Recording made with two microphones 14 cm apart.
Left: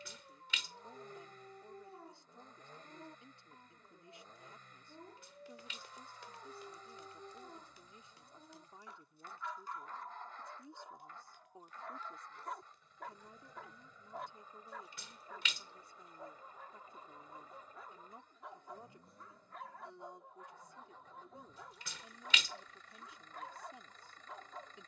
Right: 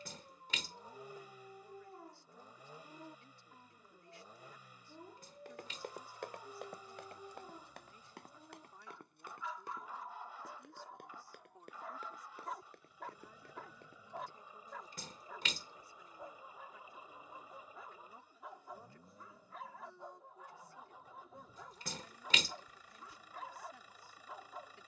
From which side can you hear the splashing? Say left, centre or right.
right.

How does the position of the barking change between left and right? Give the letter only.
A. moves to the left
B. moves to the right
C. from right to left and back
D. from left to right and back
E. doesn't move
E.